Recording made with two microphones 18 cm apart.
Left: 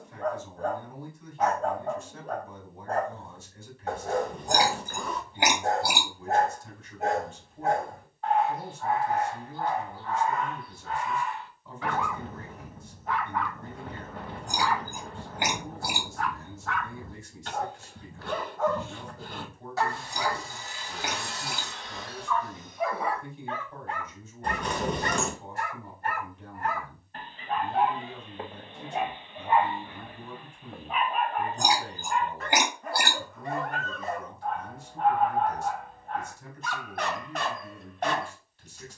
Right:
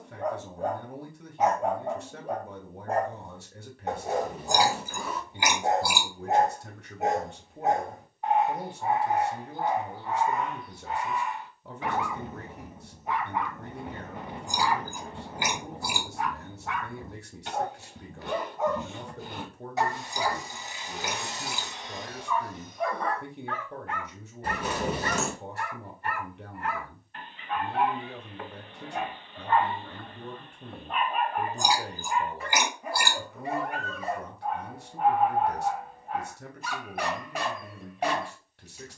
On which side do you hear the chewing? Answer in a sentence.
In this clip you hear the chewing on the left.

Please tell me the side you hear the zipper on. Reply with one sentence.
In this clip you hear the zipper in the centre.